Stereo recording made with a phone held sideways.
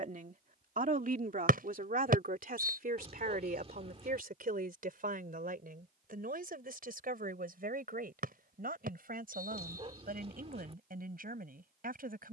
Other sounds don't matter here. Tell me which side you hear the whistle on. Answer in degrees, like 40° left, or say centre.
70° right.